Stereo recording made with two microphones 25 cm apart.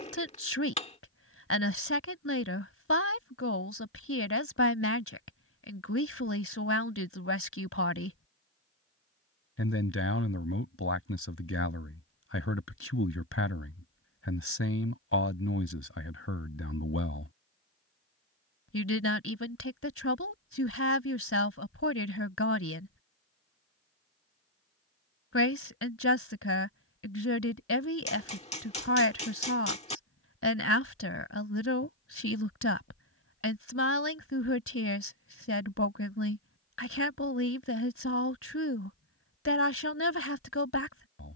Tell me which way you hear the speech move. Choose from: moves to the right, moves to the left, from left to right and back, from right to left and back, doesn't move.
doesn't move.